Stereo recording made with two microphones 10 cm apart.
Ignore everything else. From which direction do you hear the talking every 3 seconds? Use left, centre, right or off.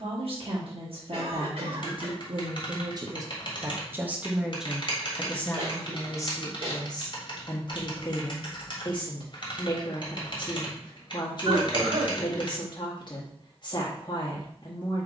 right, centre, left, left, left.